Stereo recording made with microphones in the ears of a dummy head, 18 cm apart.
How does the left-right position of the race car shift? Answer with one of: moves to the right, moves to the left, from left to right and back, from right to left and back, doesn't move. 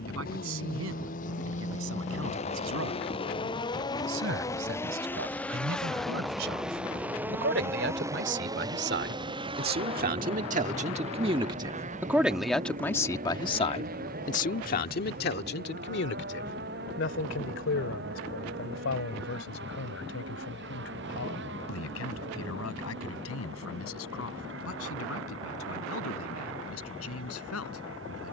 moves to the right.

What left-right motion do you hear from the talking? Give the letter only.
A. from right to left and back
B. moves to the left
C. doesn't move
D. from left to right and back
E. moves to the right
B.